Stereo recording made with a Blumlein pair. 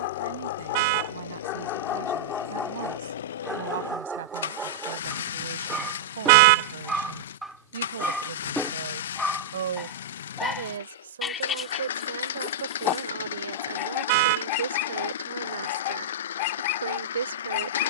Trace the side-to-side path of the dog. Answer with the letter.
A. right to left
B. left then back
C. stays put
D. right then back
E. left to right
D.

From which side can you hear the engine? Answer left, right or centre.
left.